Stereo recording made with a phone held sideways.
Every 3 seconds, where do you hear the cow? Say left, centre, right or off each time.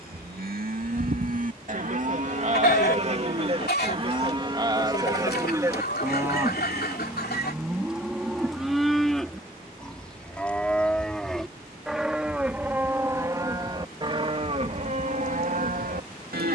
right, right, centre, centre, right, right.